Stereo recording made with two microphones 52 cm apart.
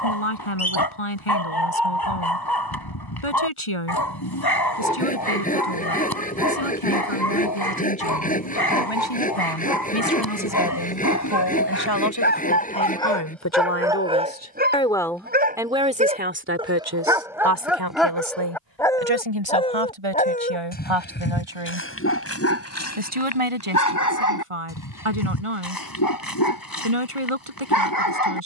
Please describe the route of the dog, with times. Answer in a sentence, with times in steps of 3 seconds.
In this clip you hear the dog on the left from 0 s, in the centre from 12 s and on the left from 21 s.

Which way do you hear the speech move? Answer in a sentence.
You can hear the speech move to the right.